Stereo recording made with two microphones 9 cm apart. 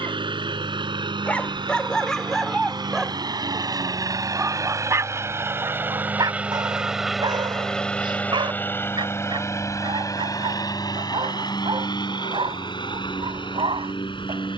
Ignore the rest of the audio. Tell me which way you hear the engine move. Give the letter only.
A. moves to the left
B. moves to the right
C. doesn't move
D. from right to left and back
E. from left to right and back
A.